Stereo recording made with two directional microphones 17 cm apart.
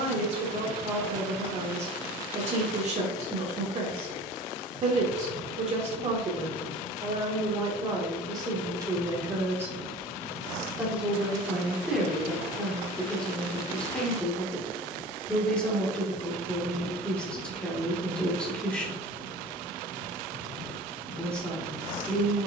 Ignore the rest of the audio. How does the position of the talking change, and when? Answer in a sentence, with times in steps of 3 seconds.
You can hear the talking on the right from 0 s and in the centre from 9 s.